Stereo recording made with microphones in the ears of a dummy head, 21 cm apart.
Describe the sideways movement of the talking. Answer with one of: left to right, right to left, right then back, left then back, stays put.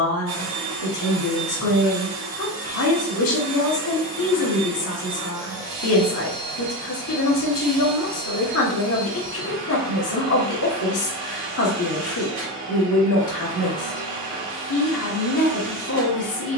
stays put.